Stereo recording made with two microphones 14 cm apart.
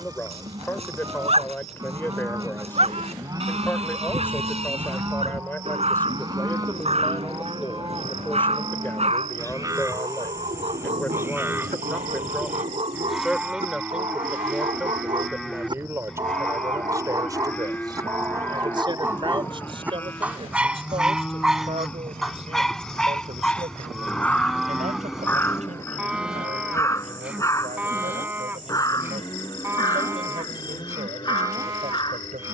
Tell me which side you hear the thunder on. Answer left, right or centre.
right.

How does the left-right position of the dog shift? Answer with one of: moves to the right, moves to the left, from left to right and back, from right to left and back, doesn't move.
moves to the left.